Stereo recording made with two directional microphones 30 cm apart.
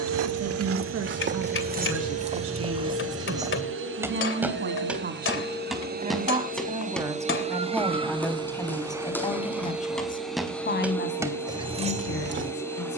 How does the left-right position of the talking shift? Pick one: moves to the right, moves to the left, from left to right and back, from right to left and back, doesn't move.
moves to the left.